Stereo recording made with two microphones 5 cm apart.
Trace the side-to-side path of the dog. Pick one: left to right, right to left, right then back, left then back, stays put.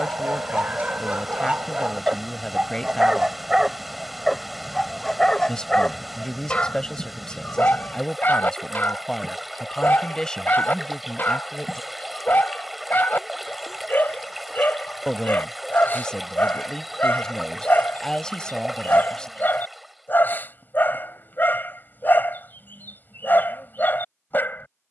right to left.